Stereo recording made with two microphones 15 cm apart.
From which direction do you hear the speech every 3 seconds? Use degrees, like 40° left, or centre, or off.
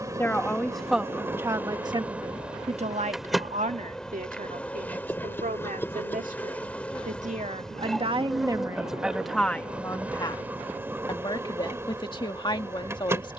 20° right, 70° right, 40° right, 20° left, 30° left.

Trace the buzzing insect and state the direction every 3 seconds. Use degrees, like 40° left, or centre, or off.
10° right, 10° left, centre, 10° right, 20° right.